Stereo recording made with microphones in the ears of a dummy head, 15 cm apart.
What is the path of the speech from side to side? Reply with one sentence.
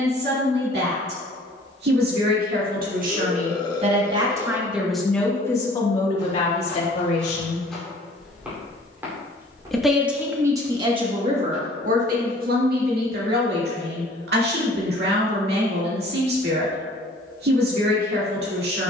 You can hear the speech go left and come back.